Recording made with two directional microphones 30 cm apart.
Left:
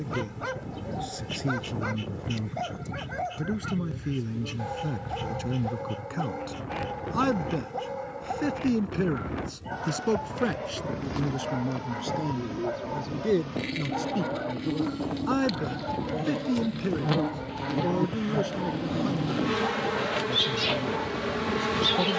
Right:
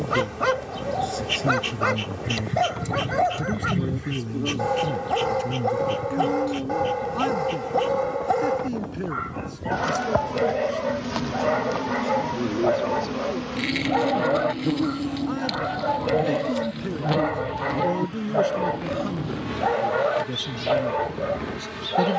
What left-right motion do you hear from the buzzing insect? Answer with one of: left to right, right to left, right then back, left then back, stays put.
right to left.